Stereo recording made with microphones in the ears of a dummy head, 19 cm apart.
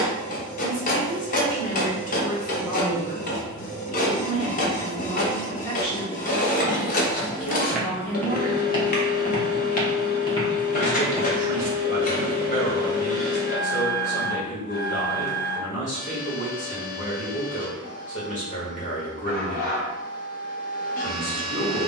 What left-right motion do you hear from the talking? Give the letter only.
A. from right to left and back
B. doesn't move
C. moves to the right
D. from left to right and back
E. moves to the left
B.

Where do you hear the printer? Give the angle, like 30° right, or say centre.
40° left.